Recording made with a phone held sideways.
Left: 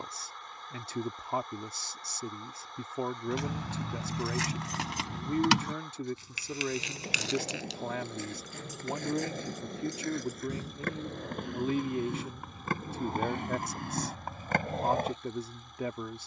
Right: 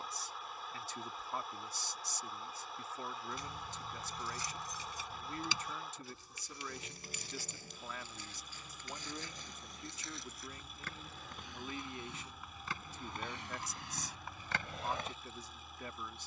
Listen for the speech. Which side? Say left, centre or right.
left.